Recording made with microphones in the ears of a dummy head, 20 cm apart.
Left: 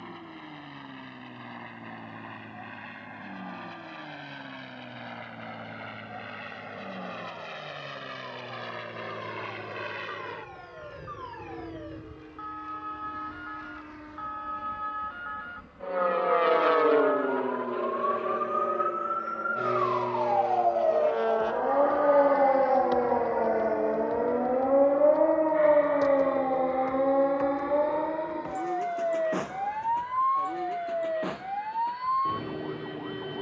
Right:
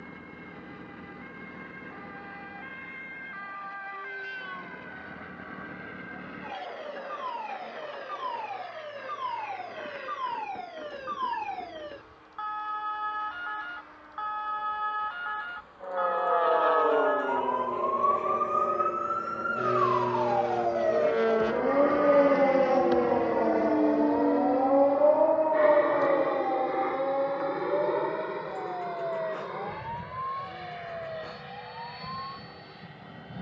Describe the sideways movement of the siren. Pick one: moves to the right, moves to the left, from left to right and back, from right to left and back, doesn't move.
moves to the left.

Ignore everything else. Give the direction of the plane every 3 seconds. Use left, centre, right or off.
left, left, left, left, left, left, centre, right, right, right, right.